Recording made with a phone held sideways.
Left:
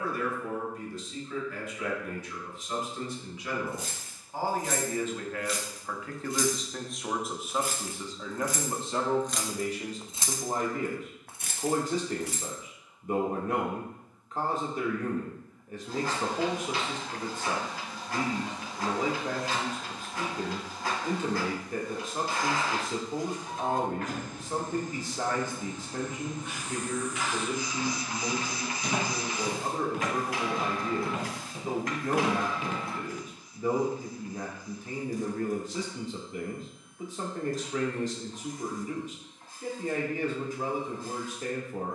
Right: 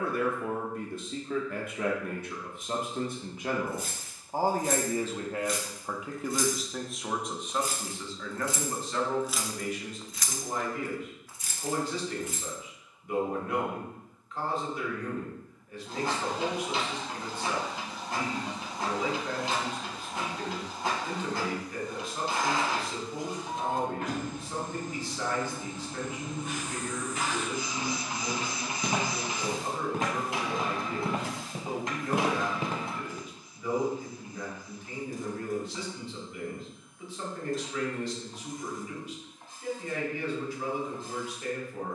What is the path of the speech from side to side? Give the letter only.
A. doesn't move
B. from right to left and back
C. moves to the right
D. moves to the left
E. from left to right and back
D.